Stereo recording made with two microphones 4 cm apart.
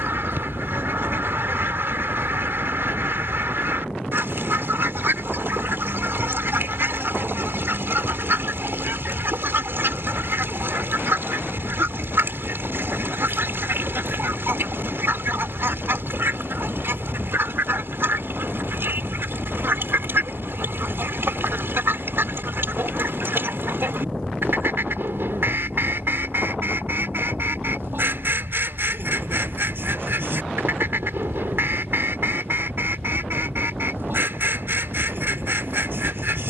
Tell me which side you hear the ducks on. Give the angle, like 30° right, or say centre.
60° right.